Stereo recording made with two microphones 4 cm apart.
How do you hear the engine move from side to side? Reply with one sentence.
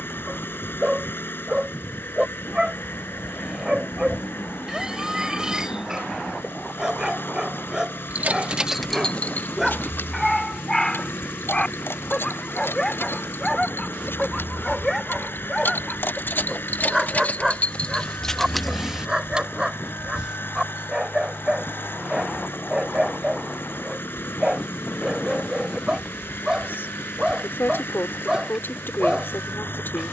You can hear the engine stay put.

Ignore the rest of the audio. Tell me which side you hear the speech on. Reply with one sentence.
In this clip you hear the speech on the left.